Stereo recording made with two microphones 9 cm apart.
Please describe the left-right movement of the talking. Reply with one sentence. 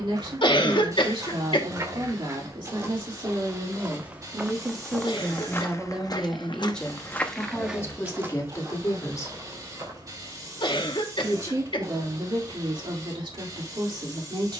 You can hear the talking go left and come back.